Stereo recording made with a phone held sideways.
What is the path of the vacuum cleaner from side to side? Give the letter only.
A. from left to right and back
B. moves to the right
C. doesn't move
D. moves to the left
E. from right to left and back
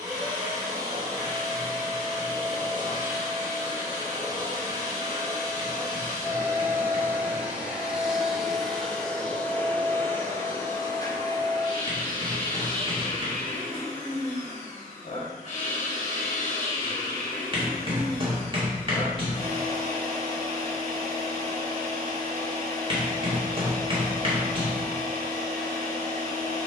D.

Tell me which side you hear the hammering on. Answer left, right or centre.
right.